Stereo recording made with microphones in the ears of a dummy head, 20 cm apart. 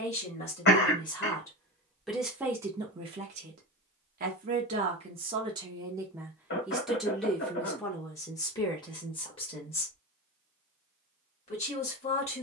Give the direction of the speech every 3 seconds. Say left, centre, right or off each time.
centre, right, centre, left.